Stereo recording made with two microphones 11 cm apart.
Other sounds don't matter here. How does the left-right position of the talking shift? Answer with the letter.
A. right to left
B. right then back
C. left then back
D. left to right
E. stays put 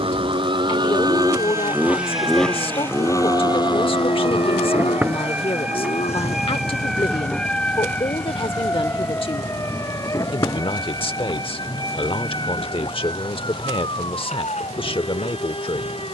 E.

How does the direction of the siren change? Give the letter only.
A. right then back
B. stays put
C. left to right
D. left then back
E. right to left
E.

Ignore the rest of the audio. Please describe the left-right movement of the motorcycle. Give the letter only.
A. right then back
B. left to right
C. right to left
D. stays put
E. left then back
C.